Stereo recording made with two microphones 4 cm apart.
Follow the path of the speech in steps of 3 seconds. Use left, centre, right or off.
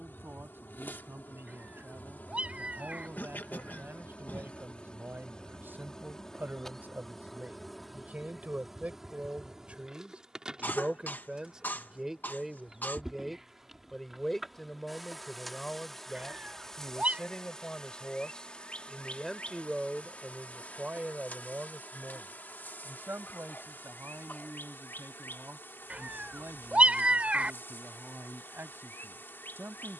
right, right, right, right, centre, left, centre, right, right, right.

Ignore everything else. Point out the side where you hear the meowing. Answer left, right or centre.
right.